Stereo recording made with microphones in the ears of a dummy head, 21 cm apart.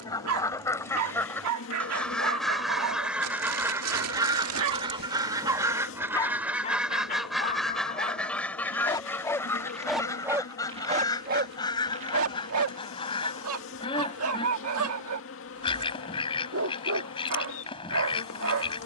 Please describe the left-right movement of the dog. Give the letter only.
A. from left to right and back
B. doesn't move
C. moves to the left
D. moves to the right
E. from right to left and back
E.